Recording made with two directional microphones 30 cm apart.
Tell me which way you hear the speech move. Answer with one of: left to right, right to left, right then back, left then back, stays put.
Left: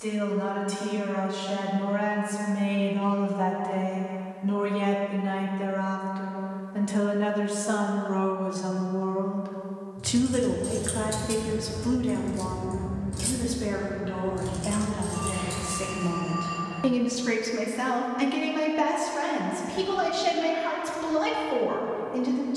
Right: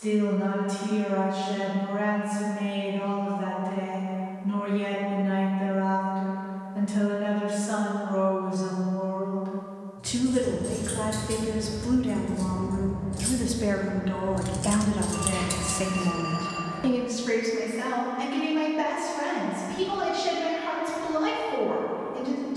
right then back.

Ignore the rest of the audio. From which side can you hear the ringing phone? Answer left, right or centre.
right.